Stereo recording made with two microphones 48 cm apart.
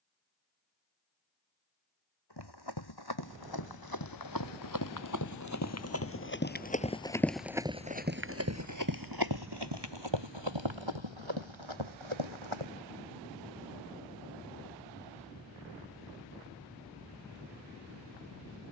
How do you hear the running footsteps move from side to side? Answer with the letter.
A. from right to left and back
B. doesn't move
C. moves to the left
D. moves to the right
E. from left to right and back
D.